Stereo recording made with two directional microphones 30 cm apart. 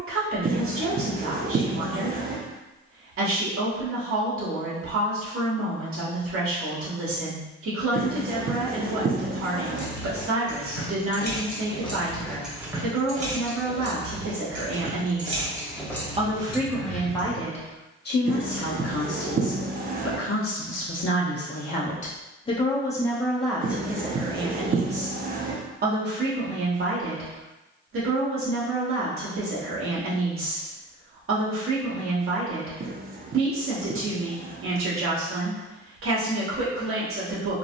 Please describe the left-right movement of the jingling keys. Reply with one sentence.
You can hear the jingling keys go right and come back.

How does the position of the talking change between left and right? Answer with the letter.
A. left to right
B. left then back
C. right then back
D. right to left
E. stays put
B.